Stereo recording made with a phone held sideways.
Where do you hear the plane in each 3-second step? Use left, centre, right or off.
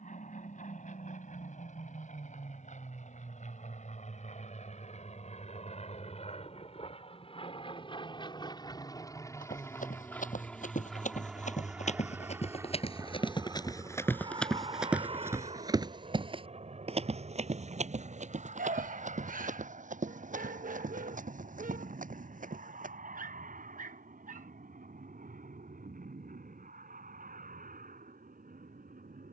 left, left, left, centre, right, right, right, right, right, right.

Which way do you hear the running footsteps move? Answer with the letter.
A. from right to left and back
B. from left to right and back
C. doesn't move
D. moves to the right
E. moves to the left
D.